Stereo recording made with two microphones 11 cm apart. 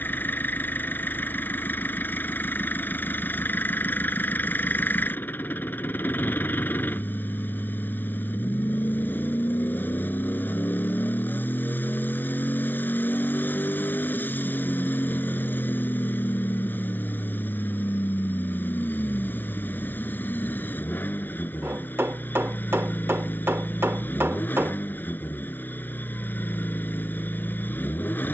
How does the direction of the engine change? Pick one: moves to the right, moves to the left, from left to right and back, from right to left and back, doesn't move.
doesn't move.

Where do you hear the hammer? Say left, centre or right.
right.